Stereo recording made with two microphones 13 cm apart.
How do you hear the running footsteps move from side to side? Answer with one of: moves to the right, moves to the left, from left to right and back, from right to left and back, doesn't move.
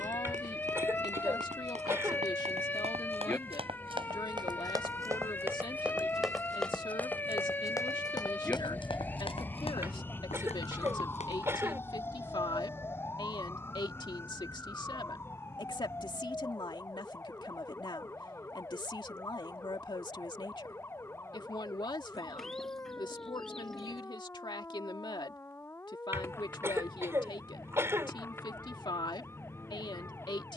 moves to the left.